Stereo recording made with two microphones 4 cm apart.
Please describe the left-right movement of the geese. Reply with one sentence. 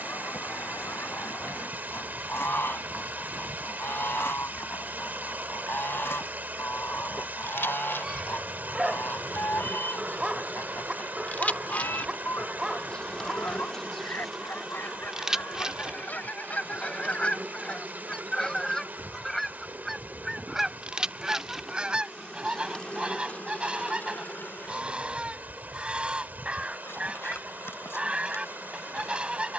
In this clip you hear the geese travel towards the right.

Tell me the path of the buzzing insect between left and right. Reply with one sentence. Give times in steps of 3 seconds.
In this clip you hear the buzzing insect on the left from 0 s, in the centre from 12 s, on the right from 15 s, in the centre from 21 s and on the left from 24 s.